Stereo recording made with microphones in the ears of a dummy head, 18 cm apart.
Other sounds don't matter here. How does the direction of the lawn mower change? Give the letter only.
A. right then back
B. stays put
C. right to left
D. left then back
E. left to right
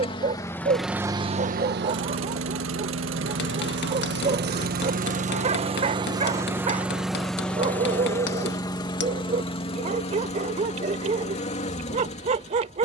A.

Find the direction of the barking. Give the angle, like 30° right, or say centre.
40° right.